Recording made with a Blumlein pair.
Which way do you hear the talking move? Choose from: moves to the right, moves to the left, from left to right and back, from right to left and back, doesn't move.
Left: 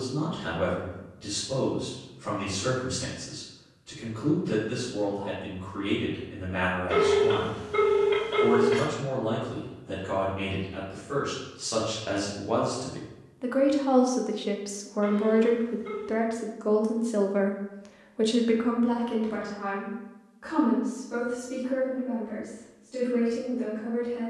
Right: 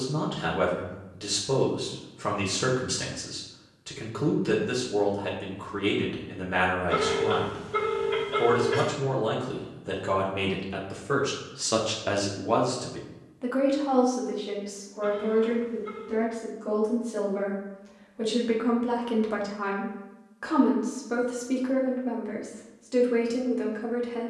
from right to left and back.